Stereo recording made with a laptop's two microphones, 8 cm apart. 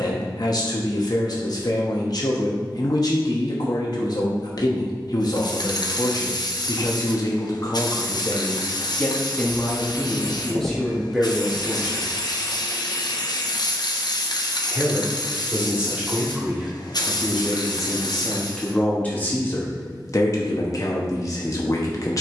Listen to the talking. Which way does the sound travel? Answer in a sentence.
You can hear the talking move from left to right and back again.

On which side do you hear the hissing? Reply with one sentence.
In this clip you hear the hissing on the left.